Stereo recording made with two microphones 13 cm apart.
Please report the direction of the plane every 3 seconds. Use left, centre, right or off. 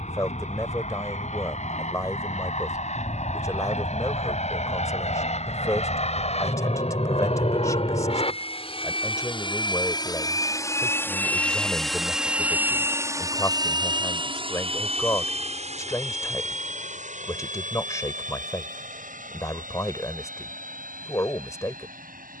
left, left, left, left, right, right, right, right.